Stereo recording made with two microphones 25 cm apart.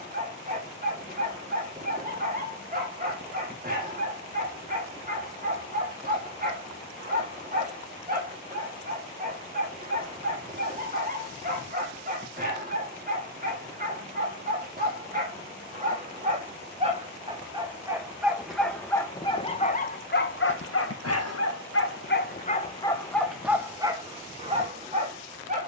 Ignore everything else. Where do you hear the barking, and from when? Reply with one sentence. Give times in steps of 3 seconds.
You can hear the barking on the right from 0 s, on the left from 18 s and on the right from 24 s.